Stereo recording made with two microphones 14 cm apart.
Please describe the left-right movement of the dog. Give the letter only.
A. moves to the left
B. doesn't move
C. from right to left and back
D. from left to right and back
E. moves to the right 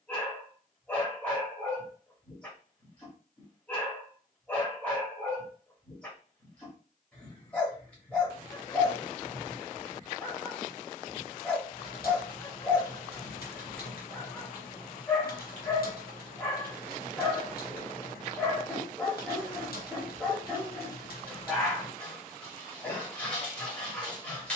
B.